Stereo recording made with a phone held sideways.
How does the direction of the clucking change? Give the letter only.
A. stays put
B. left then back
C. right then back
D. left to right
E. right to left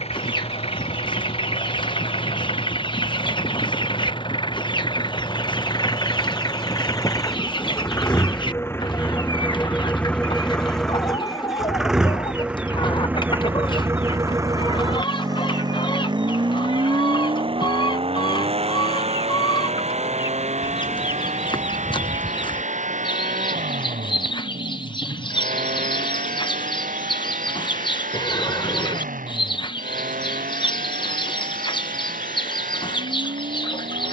A.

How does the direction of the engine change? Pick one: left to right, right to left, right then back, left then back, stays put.
left to right.